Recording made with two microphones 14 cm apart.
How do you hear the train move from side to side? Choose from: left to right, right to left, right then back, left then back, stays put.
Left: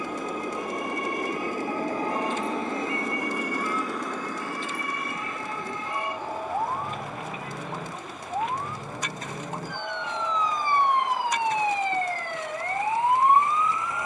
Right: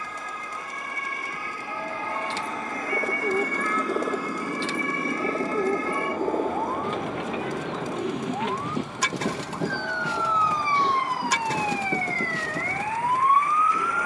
left to right.